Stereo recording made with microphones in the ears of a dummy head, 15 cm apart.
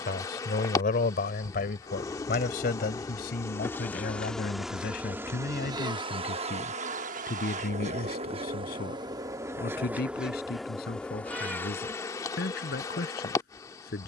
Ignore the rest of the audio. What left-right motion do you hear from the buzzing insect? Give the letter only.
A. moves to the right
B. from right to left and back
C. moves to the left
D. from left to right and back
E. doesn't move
D.